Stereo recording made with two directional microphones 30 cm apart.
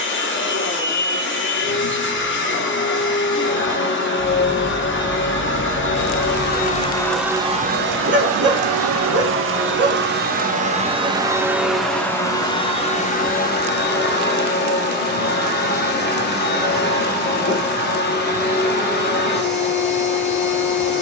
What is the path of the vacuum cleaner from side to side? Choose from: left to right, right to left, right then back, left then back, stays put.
right then back.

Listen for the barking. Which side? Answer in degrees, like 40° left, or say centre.
40° right.